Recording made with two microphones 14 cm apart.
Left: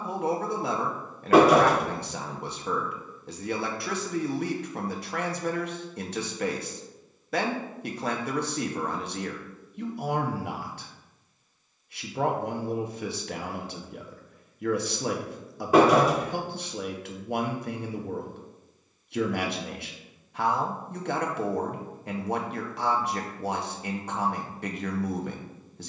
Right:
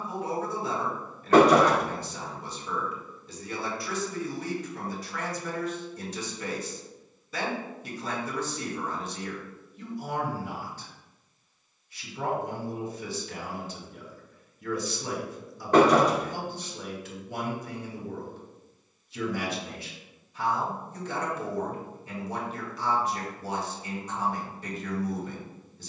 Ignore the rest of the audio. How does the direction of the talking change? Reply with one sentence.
You can hear the talking stay in one place.